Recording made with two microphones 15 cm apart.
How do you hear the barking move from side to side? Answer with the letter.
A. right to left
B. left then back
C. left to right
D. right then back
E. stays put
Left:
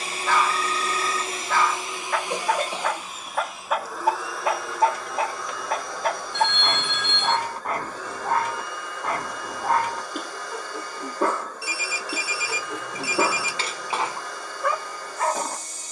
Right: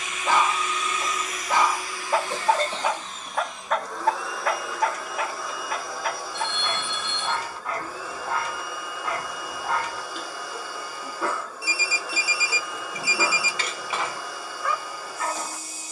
A.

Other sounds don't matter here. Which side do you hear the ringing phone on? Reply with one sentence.
You can hear the ringing phone on the left.